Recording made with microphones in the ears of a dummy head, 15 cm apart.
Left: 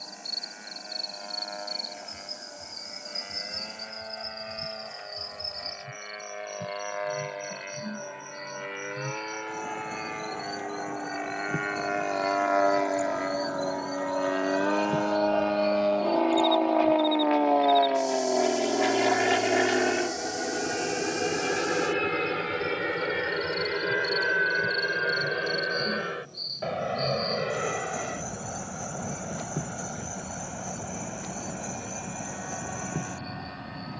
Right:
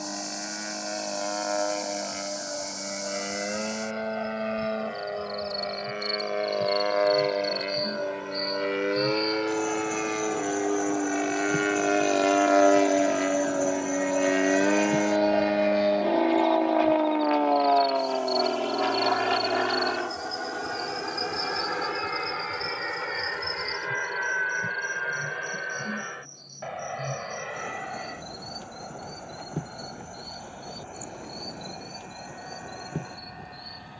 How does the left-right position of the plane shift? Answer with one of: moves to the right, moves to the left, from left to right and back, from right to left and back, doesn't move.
moves to the left.